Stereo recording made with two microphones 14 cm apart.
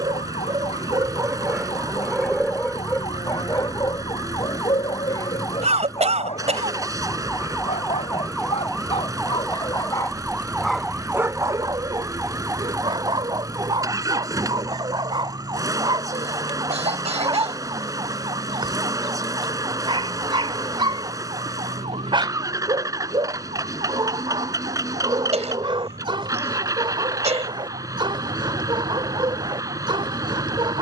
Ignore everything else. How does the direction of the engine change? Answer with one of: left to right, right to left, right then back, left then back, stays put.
stays put.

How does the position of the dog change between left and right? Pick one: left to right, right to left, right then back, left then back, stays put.
left then back.